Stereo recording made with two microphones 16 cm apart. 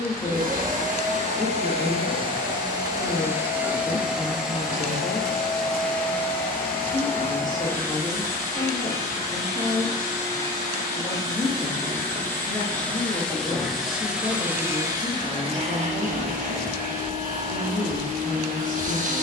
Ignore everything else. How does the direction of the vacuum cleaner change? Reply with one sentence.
You can hear the vacuum cleaner go left and come back.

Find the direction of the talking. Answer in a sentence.
In this clip you hear the talking on the left.